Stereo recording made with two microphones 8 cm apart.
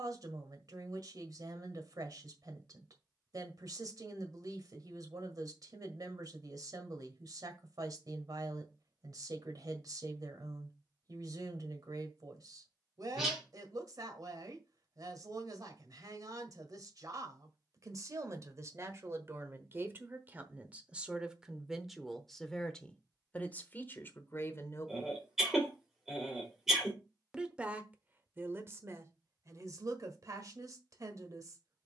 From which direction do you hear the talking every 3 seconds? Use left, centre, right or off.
right, right, right, right, right, right, right, centre, left, right, right.